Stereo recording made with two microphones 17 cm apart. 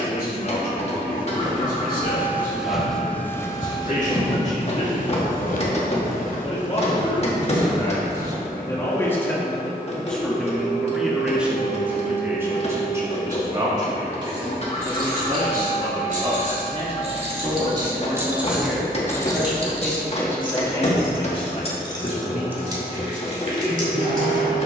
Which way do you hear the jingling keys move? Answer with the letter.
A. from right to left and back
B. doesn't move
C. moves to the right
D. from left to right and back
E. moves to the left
A.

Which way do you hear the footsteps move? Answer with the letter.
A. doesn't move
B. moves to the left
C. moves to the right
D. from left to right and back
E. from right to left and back
E.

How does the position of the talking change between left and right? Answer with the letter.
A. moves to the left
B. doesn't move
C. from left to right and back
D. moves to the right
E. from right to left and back
C.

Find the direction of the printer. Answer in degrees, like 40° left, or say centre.
40° left.